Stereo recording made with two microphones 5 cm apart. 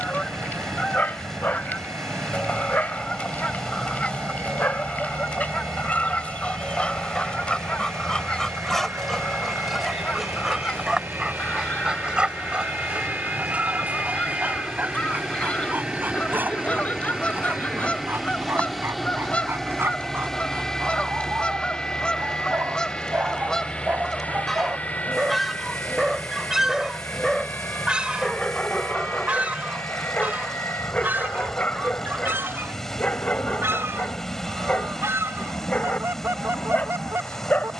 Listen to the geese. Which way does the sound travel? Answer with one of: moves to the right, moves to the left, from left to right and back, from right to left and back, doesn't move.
moves to the right.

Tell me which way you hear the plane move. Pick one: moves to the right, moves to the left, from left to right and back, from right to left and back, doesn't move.
moves to the left.